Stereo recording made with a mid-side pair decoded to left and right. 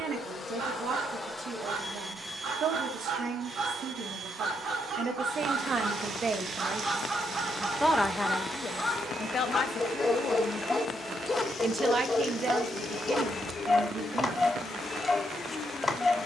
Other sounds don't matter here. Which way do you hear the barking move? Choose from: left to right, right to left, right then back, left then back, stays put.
right to left.